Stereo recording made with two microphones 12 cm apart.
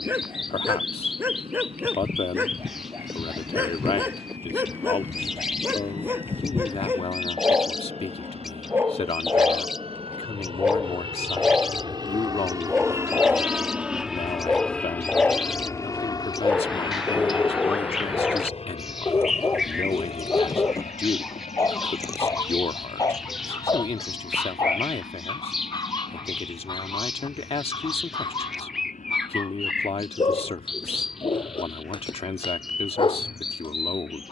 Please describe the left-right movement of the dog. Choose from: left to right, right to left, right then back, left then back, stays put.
right to left.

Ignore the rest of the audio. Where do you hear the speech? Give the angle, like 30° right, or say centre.
50° left.